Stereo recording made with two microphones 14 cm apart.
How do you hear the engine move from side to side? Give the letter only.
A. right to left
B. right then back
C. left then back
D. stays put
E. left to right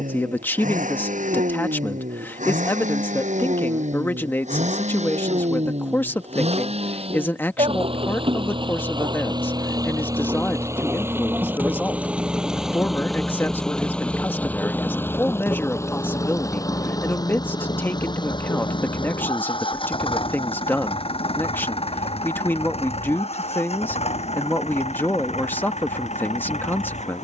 A.